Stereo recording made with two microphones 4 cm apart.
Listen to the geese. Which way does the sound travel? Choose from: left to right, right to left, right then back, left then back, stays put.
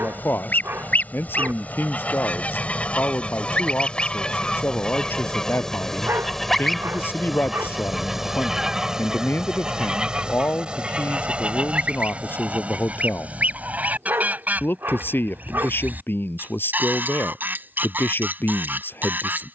left to right.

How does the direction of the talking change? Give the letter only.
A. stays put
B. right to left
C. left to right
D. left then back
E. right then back
A.